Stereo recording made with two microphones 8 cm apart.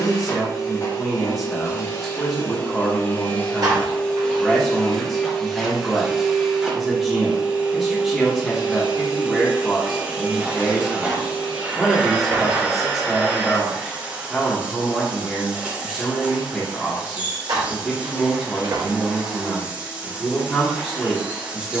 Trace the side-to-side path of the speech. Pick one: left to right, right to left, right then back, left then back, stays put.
stays put.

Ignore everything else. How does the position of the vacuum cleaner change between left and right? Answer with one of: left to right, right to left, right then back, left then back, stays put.
left to right.